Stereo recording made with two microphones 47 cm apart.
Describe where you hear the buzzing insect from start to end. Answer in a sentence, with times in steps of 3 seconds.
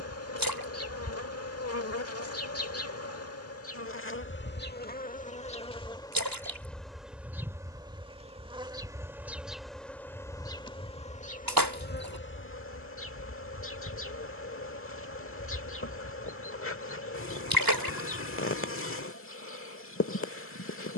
You can hear the buzzing insect on the left from 0 s, in the centre from 6 s and on the left from 12 s.